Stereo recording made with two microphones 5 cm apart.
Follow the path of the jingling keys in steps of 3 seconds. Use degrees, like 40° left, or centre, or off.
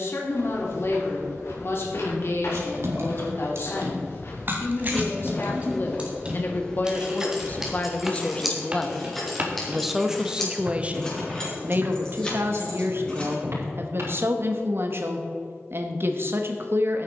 60° right, 40° right, 10° right, 10° left, 20° left, off.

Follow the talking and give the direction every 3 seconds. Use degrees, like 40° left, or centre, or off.
60° left, 50° left, 30° left, 20° right, 50° right, 50° right.